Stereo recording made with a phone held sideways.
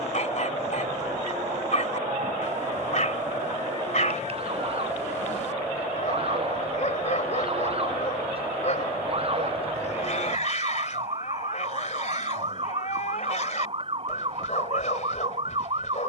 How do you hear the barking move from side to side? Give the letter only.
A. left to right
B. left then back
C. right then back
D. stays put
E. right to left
D.